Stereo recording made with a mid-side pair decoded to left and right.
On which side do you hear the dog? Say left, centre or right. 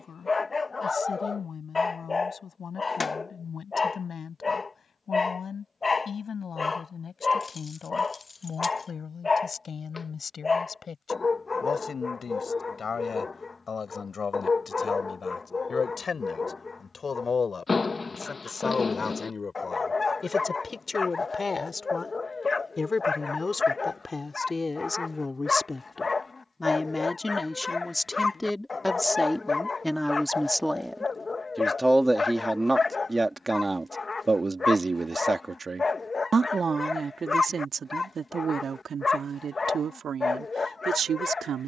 left.